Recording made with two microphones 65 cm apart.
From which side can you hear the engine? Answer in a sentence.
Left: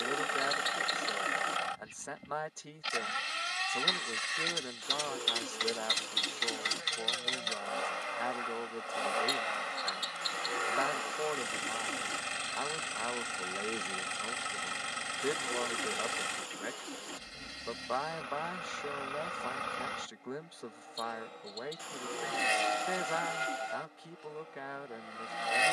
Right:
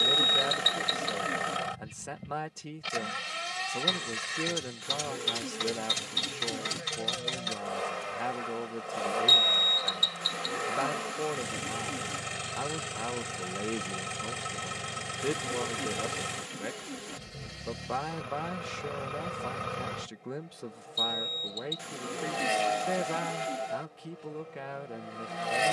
You can hear the engine on the right.